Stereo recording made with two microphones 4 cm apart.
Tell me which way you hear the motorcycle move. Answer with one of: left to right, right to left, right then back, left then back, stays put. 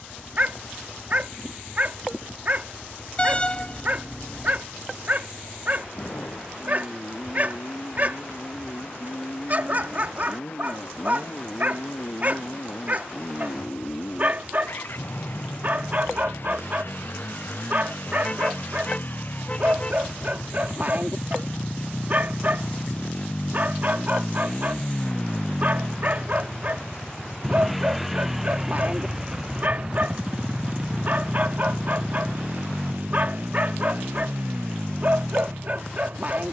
left to right.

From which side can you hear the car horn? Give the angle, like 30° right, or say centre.
30° left.